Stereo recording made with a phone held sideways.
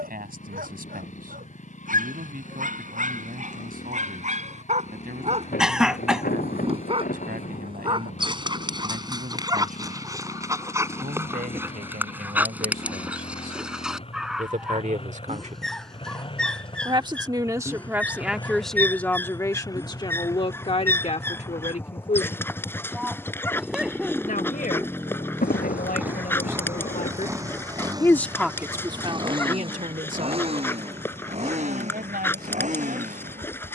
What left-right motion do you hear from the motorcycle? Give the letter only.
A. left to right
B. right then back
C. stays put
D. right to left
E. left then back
A.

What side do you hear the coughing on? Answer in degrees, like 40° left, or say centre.
centre.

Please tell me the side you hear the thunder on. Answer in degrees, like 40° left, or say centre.
70° left.